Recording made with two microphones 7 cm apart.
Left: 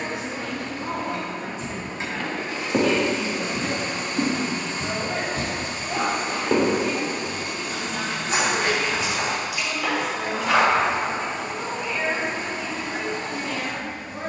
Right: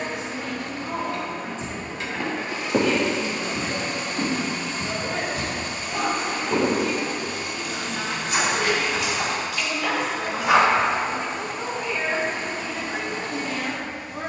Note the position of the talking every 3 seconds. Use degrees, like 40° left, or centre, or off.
60° left, 50° left, 20° left, centre, 10° right.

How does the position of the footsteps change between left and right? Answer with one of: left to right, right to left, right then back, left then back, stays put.
left then back.